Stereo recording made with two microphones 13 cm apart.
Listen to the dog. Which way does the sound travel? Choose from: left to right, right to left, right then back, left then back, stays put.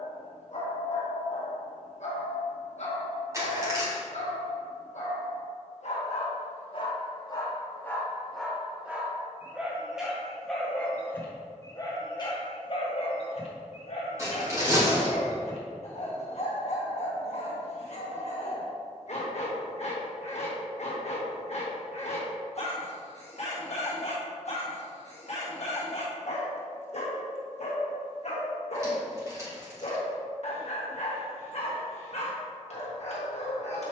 right then back.